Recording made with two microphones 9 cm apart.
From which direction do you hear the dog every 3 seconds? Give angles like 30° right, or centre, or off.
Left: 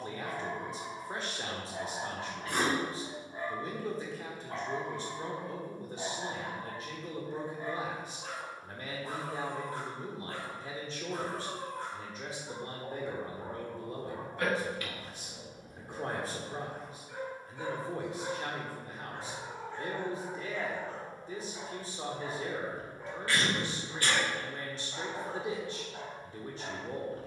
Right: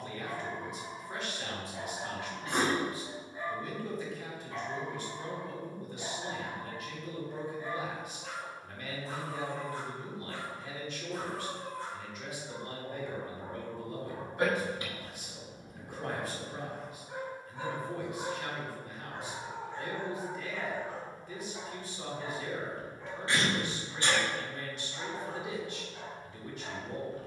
50° left, 50° left, 50° left, 50° left, 30° left, 20° right, 20° right, 10° left, 40° left.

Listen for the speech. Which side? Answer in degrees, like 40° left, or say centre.
30° left.